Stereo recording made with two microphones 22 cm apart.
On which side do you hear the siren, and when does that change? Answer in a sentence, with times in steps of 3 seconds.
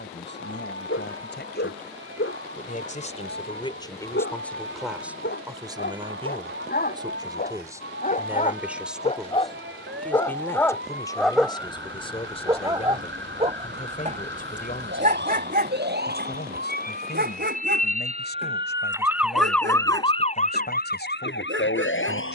You can hear the siren on the right from 0 s, in the centre from 18 s and on the left from 21 s.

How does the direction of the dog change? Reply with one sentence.
In this clip you hear the dog move from left to right.